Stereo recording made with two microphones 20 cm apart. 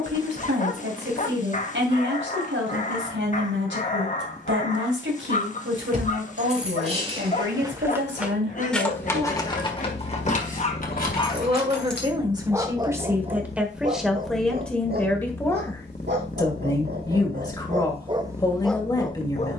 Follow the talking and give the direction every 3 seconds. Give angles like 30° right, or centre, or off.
70° right, 70° right, 70° right, 40° right, 10° right, 20° left, 20° left.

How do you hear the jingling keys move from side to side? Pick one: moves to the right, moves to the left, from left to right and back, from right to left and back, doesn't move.
moves to the left.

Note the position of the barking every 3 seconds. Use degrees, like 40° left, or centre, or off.
40° left, 40° left, 40° left, 40° left, 30° right, 50° right, 10° left.